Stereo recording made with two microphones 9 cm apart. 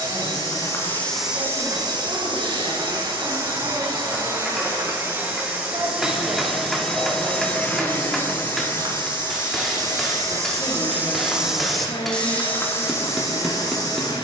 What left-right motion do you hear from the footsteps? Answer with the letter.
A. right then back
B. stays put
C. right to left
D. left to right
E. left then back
A.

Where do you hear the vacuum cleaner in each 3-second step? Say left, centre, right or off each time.
right, right, centre, left, left.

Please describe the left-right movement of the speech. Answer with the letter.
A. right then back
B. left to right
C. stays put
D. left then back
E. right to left
E.